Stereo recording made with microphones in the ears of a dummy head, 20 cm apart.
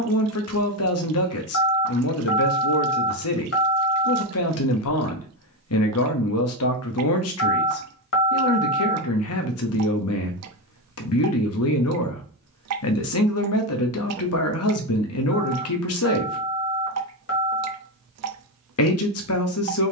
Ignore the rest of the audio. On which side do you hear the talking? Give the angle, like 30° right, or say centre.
70° left.